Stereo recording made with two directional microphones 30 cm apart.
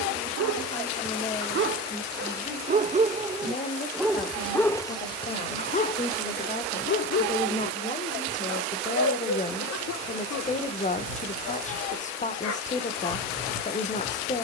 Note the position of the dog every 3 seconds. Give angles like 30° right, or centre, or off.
40° right, 10° left, 40° left, 60° left, 70° left.